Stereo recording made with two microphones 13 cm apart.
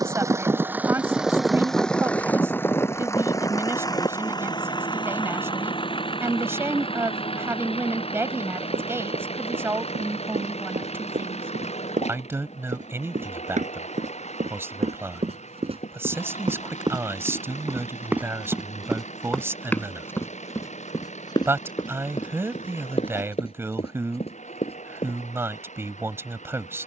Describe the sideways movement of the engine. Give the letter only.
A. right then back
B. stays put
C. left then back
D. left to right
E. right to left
E.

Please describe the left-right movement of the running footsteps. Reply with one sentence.
In this clip you hear the running footsteps go from the right side to the left.